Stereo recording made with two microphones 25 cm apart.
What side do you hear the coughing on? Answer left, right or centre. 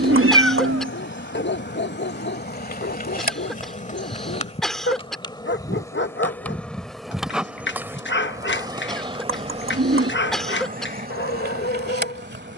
centre.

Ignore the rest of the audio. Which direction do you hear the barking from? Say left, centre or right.
left.